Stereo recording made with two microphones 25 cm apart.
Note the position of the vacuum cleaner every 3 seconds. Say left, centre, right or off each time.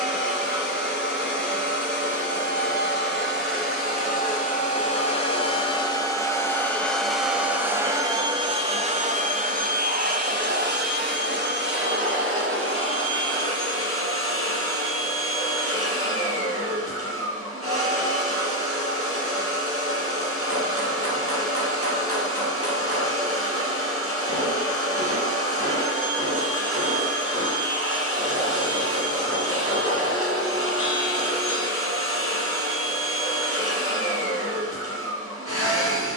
left, left, centre, right, right, right, right, right, right, right, right, right.